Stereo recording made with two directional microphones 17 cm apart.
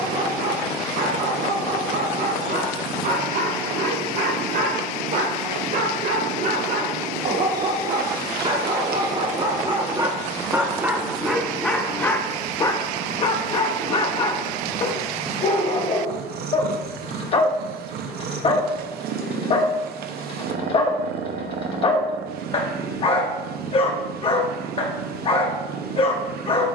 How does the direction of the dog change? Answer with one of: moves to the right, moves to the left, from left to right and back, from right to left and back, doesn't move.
moves to the left.